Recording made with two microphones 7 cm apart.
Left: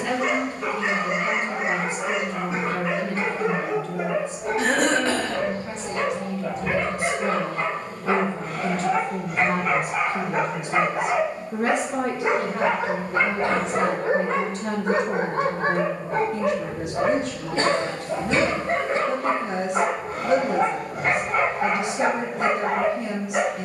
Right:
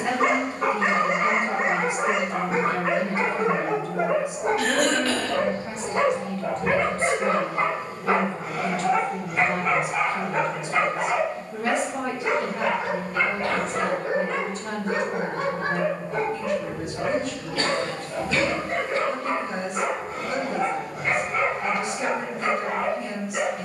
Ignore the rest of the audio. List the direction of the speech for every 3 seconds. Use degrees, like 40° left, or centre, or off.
20° right, 10° right, 20° left, 60° left, 70° left, 70° left, 70° left, 70° left.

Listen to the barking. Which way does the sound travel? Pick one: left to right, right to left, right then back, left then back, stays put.
right to left.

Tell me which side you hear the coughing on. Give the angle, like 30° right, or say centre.
30° left.